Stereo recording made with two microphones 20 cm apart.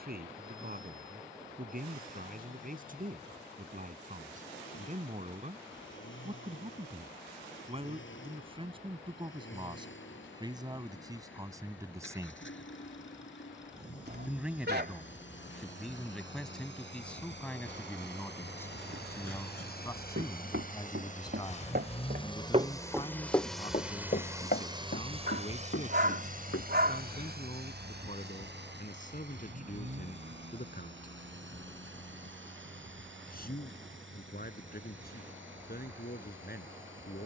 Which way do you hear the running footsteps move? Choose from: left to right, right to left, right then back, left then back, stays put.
right to left.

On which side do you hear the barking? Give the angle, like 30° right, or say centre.
60° right.